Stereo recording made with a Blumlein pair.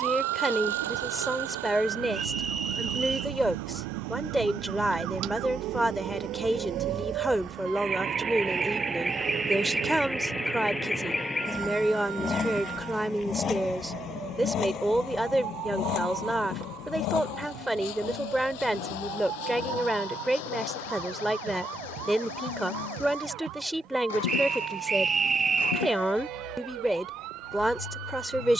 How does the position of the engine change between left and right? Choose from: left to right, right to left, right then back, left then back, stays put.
right to left.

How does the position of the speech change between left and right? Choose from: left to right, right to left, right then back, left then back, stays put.
stays put.